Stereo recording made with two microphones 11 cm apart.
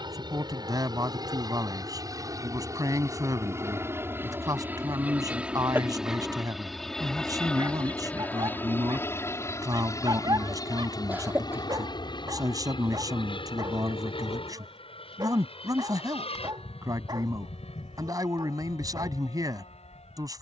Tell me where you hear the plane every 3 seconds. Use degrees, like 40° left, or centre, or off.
40° right, 20° right, 10° left, 30° left, 50° left, 60° left, 60° left.